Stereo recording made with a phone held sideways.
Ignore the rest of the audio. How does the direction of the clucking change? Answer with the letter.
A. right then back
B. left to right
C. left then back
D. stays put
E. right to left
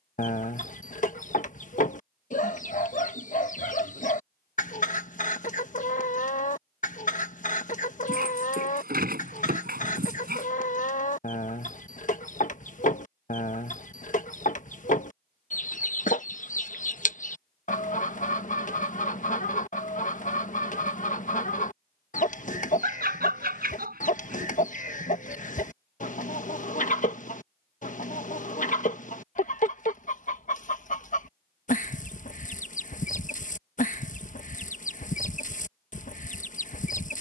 D.